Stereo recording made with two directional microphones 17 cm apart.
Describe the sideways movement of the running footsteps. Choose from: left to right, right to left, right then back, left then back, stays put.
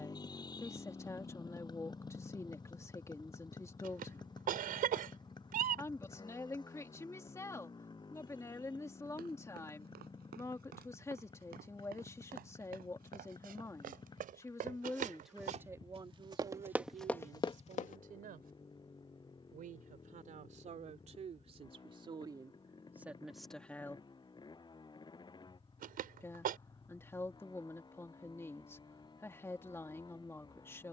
right to left.